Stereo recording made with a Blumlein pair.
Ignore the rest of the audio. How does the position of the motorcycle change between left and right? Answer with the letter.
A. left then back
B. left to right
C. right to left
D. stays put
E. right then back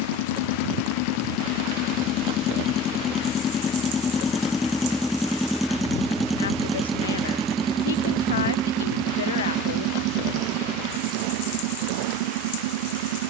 B.